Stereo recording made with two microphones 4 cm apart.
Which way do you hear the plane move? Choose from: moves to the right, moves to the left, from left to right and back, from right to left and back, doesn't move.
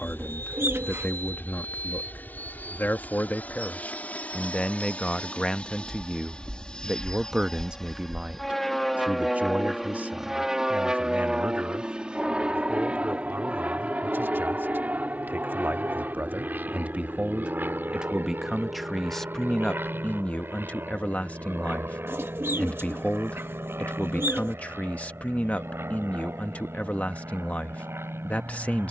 moves to the right.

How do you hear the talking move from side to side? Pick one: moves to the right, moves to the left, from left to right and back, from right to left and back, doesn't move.
from left to right and back.